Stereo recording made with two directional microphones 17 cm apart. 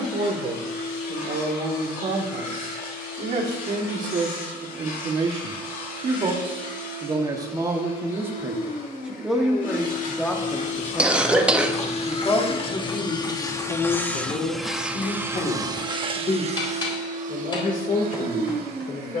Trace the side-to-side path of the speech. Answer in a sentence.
In this clip you hear the speech move to the left.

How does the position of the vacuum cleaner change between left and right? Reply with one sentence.
You can hear the vacuum cleaner move to the right.